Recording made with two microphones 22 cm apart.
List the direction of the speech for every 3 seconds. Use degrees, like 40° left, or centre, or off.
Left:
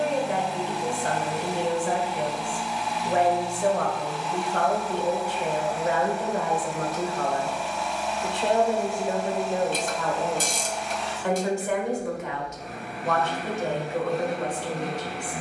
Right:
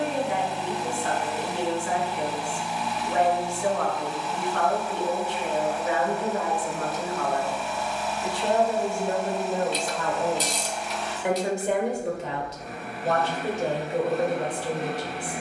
40° left, 40° left, 30° left, centre, 30° right.